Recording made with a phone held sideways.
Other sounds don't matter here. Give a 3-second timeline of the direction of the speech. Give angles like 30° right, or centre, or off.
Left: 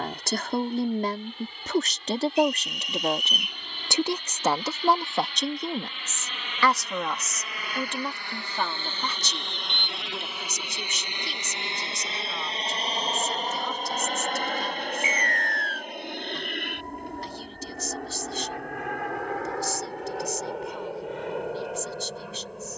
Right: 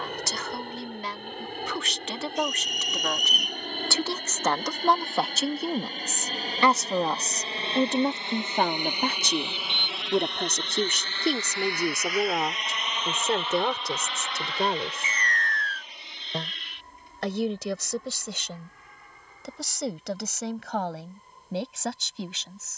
40° left, 10° left, 30° right, 60° right, 70° right, 80° right, 80° right, 80° right.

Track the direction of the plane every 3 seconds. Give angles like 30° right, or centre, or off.
70° right, 50° right, 30° right, 10° left, 40° left, 50° left, 60° left, 70° left.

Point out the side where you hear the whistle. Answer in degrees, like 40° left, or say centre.
40° right.